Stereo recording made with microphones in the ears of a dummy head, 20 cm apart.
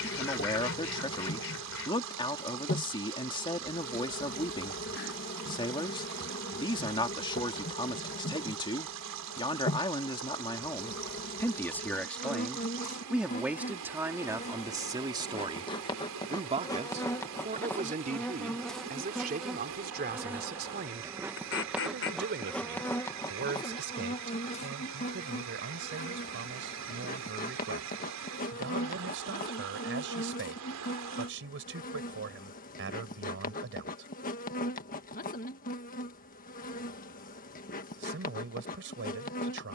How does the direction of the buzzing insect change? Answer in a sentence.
You can hear the buzzing insect move from left to right and back again.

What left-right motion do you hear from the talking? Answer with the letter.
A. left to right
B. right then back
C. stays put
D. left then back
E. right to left
A.